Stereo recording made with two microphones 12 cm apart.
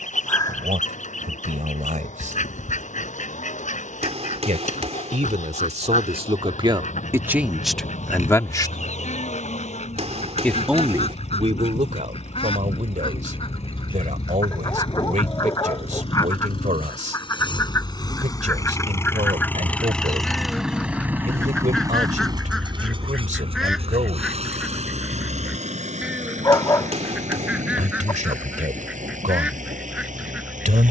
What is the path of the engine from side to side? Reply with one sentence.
In this clip you hear the engine go from the left side to the right.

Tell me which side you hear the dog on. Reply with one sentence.
You can hear the dog on the left.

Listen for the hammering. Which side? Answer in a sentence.
In this clip you hear the hammering on the right.